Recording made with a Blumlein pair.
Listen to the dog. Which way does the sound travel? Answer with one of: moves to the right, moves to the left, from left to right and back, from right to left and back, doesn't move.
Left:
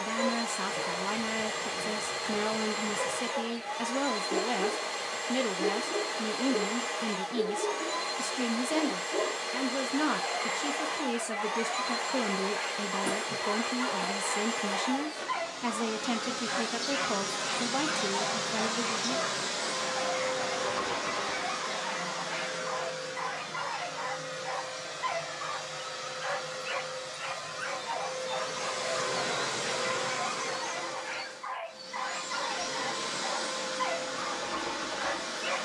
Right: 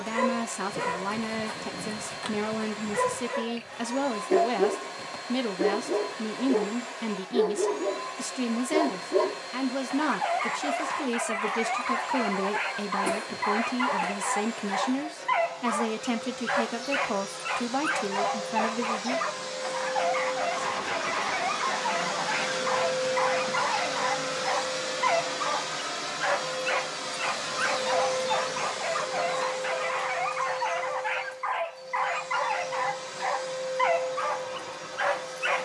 doesn't move.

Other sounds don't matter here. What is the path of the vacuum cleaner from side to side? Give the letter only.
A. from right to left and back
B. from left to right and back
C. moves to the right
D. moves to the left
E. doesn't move
B.